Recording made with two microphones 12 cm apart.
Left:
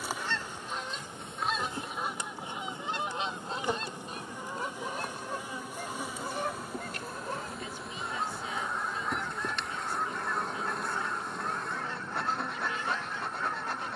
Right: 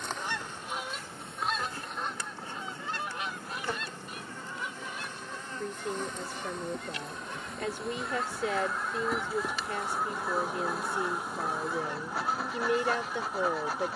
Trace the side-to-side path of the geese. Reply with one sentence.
In this clip you hear the geese go left and come back.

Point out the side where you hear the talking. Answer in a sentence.
You can hear the talking on the right.